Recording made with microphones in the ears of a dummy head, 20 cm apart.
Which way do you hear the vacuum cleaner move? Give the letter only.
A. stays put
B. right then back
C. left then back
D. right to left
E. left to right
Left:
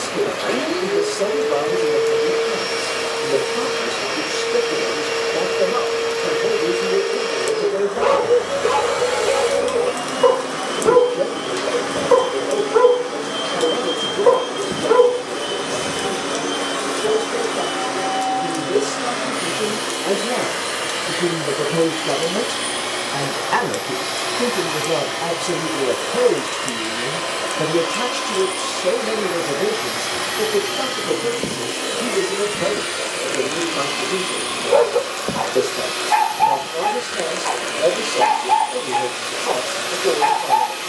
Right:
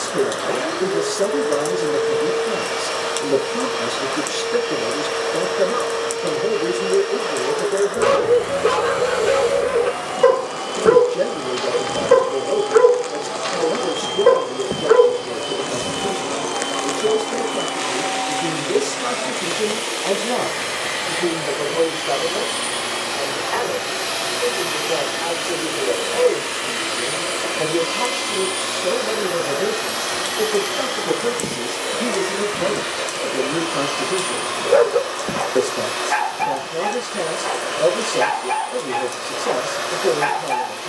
B.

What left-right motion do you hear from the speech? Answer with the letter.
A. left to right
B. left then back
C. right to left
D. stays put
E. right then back
B.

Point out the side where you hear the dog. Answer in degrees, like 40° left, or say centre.
20° right.